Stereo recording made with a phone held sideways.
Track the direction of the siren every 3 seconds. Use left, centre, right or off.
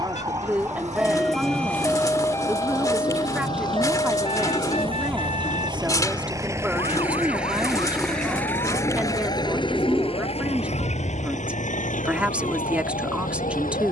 centre, left, left, left, left.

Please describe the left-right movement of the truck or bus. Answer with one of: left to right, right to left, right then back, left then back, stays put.
right to left.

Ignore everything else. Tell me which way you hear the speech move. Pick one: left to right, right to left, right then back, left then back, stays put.
stays put.